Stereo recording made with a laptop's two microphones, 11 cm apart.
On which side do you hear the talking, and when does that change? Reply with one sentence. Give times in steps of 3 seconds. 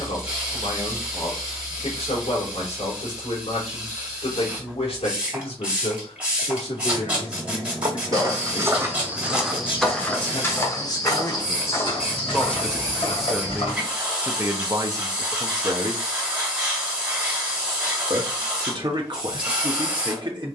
In this clip you hear the talking on the left from 0 s, in the centre from 12 s and on the right from 15 s.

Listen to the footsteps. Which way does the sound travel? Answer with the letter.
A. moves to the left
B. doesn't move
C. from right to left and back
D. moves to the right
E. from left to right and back
A.